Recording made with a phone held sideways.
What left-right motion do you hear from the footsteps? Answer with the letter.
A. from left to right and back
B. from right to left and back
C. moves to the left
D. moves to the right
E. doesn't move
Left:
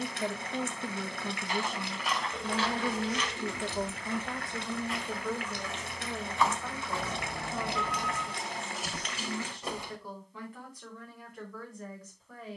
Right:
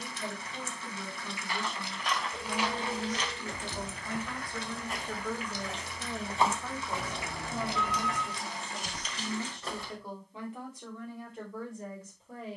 A.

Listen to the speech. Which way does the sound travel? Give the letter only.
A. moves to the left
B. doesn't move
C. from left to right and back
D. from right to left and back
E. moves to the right
E.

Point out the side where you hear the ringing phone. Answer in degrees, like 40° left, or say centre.
10° left.